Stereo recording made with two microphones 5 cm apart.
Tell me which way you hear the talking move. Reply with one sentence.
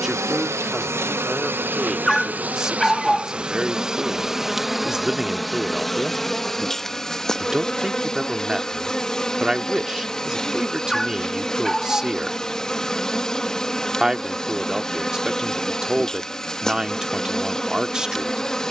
You can hear the talking stay in one place.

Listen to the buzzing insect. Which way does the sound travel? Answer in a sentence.
In this clip you hear the buzzing insect travel towards the left.